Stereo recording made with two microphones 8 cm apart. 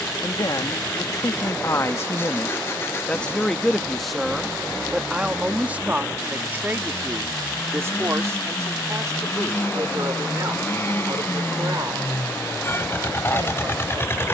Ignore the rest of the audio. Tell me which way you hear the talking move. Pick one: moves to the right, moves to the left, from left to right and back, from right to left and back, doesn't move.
moves to the right.